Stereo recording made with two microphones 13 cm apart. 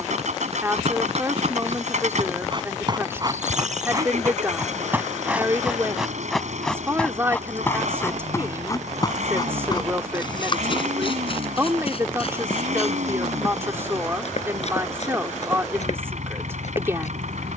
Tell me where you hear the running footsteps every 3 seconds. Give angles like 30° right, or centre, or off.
40° right, 20° right, 10° left, 40° left, 50° left, 60° left.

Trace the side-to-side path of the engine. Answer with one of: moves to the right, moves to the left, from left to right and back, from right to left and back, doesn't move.
doesn't move.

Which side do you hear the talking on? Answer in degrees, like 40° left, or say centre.
20° right.